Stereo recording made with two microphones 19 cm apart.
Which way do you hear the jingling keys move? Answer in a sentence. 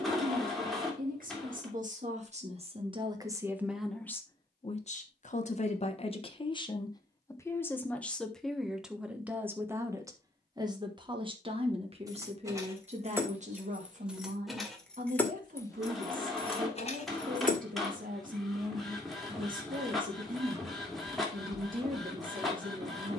In this clip you hear the jingling keys go from the right side to the left.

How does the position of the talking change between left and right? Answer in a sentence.
In this clip you hear the talking move from right to left and back again.